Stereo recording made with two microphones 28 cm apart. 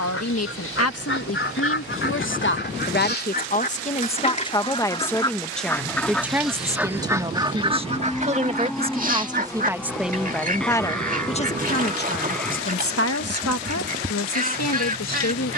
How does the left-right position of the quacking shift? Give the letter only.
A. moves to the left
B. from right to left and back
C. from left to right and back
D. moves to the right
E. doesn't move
D.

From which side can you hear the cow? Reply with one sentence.
In this clip you hear the cow in the centre.